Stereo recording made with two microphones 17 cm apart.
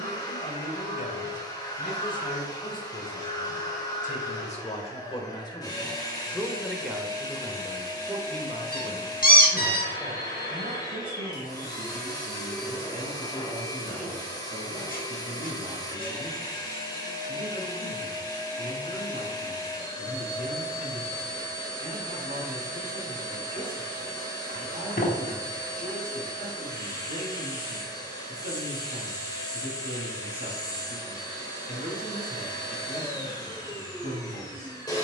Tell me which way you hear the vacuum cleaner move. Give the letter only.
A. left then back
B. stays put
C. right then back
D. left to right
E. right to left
B.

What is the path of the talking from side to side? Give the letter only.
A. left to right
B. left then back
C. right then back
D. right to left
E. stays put
A.